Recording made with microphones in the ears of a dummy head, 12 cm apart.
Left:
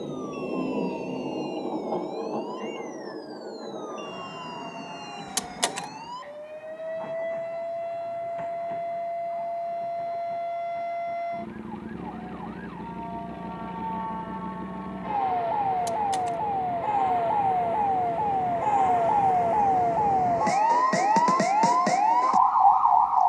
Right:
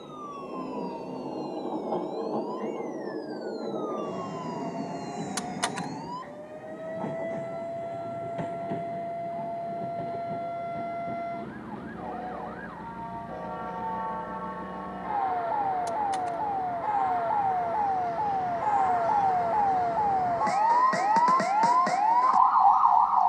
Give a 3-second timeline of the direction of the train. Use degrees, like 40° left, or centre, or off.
10° left, 20° right, 40° right, 40° right, 50° right, 50° right, 50° right, 50° right.